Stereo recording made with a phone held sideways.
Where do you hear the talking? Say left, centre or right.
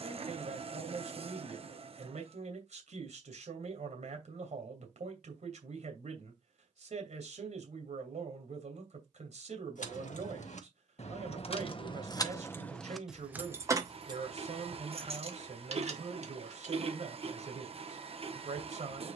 right.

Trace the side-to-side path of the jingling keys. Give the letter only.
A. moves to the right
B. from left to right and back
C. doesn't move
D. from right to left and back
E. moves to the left
A.